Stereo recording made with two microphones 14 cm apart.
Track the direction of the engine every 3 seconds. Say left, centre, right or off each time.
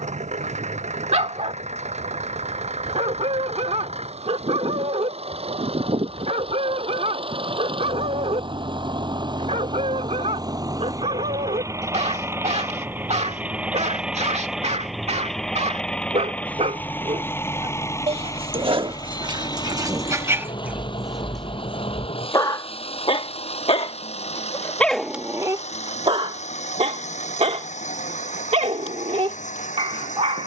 right, right, right, right, centre, centre, left, left, left, left.